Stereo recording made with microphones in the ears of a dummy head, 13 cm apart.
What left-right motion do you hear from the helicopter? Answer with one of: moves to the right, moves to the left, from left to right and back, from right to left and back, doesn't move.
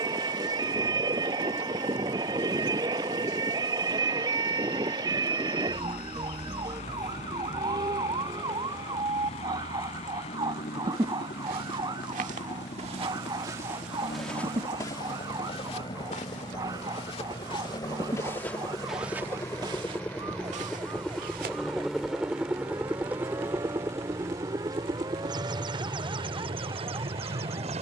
moves to the right.